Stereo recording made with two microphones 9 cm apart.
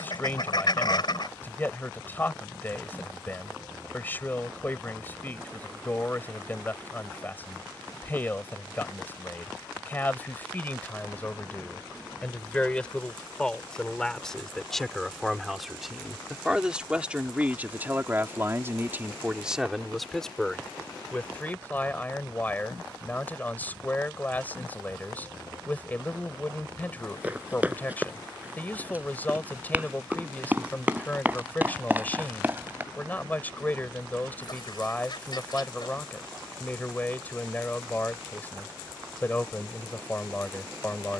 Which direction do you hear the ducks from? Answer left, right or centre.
left.